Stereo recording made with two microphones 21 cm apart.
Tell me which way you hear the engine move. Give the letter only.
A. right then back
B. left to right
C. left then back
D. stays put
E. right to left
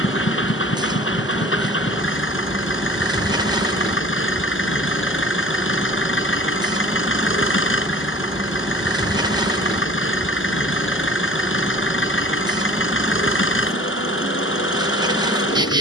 D.